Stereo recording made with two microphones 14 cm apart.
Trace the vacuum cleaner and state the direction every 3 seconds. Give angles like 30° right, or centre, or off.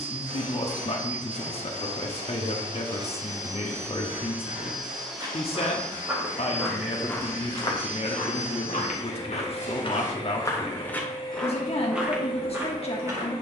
40° right, 10° right, 30° left, 40° left, 40° left.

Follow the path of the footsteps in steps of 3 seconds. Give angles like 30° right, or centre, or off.
off, 20° right, 30° left, 20° left, 20° right.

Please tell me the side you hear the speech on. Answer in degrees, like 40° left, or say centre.
40° left.